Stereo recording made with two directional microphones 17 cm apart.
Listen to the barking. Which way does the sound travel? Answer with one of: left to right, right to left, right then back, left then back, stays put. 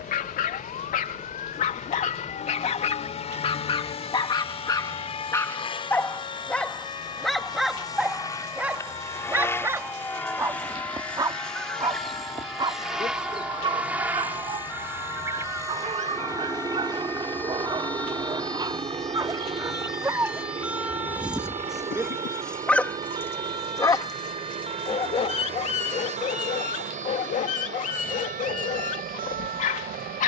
right then back.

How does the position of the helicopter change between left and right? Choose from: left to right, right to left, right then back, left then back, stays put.
left to right.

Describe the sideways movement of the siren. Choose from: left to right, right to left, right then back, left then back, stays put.
left to right.